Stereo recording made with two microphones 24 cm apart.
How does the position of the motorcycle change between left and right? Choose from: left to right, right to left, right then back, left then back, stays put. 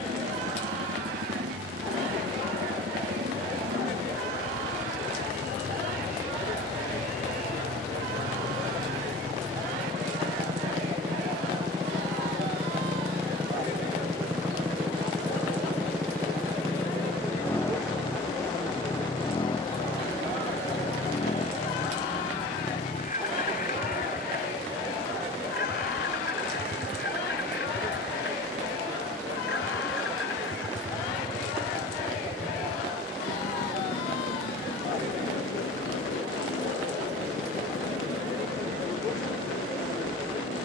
right to left.